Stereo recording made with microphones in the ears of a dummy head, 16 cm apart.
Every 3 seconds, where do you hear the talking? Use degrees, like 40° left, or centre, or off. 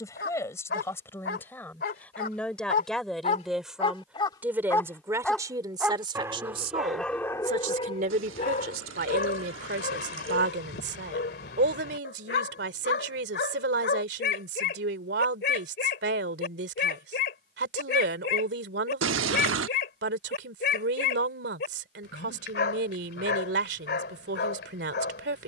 10° left, 10° right, 40° right, 60° right, 60° right, 60° right, 60° right, 60° right, 60° right.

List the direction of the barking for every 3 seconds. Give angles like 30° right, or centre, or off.
60° left, 20° left, 20° left, 60° left, 60° left, 60° left, 60° left, 60° left, 60° left.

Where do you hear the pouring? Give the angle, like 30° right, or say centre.
80° right.